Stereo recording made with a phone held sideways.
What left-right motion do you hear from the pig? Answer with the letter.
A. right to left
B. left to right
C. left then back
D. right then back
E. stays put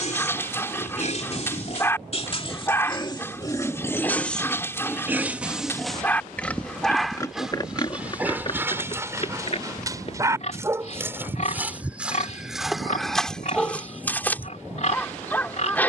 D.